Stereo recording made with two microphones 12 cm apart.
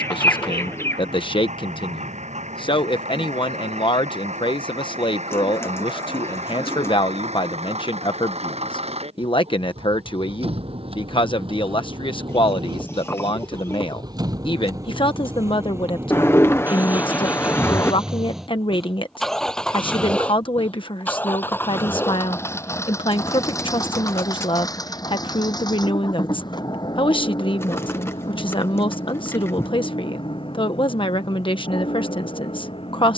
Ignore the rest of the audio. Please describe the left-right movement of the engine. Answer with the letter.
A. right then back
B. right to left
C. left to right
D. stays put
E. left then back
B.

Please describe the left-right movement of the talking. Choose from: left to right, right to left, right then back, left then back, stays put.
stays put.